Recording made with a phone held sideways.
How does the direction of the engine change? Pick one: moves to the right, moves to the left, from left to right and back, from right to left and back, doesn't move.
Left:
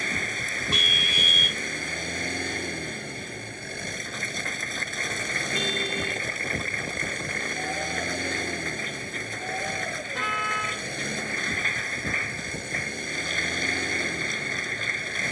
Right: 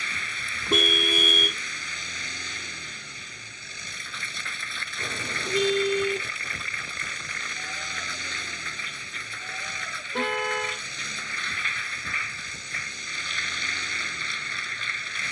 doesn't move.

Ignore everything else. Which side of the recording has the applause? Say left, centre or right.
left.